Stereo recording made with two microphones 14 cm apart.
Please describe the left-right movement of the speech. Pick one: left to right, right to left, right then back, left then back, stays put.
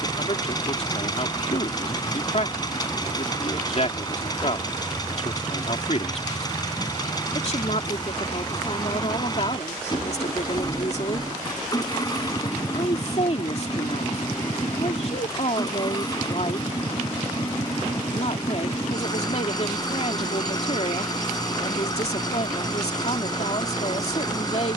stays put.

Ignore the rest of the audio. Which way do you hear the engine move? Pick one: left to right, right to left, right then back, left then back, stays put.
stays put.